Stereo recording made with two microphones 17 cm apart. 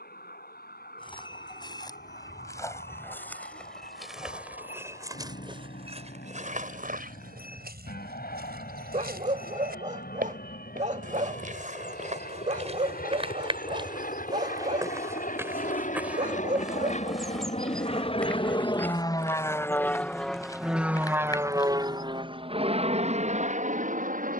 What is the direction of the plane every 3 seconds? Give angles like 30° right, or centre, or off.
80° left, 80° left, 70° left, 70° left, 60° left, 50° left, 20° left, 30° right.